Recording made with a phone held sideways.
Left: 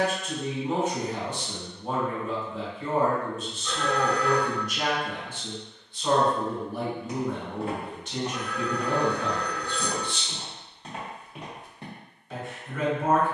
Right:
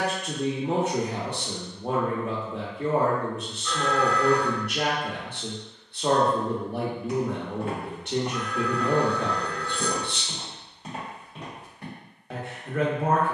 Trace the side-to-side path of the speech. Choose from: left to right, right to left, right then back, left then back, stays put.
stays put.